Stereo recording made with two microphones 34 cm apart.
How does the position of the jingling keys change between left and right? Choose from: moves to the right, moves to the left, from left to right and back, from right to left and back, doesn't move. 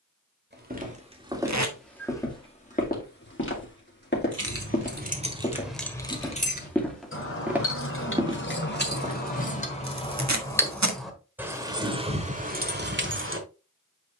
from right to left and back.